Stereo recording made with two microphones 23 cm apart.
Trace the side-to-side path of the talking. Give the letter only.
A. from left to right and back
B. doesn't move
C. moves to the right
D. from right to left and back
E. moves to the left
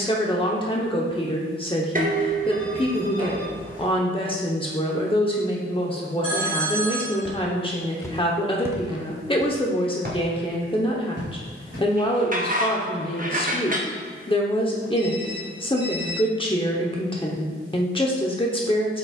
B.